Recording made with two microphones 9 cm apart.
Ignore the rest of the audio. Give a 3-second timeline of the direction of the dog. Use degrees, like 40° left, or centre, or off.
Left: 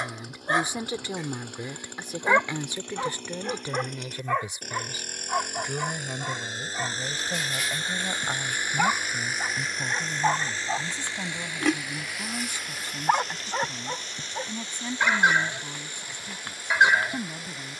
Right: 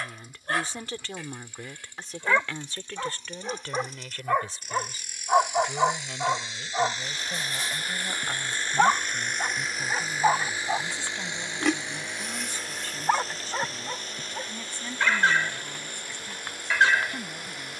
20° left, 20° right, 30° right, 10° right, 10° left, 20° left.